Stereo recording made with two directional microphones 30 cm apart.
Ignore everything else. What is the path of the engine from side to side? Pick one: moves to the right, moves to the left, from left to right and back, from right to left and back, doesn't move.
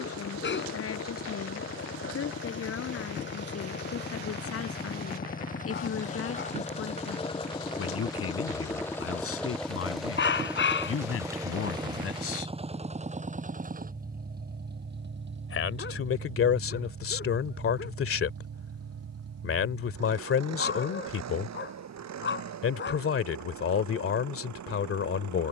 moves to the right.